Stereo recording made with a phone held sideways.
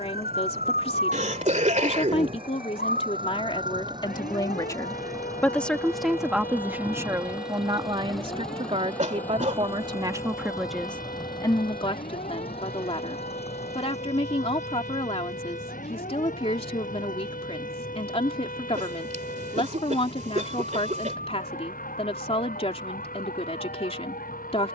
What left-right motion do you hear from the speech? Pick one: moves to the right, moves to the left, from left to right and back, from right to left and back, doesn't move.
from left to right and back.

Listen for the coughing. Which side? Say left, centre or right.
right.